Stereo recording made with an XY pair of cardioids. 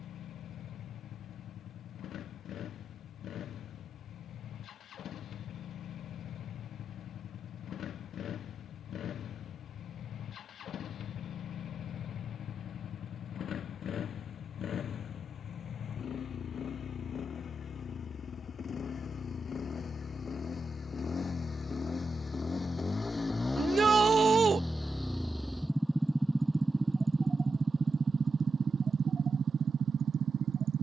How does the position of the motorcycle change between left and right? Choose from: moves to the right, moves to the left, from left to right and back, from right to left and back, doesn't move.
moves to the right.